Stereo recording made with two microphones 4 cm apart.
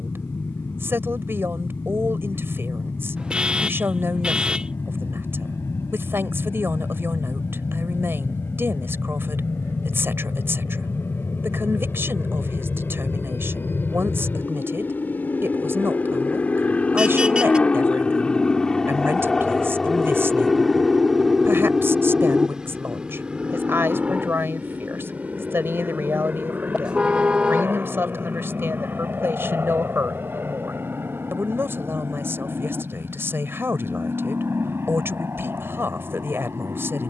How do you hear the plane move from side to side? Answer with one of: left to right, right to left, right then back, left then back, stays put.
left to right.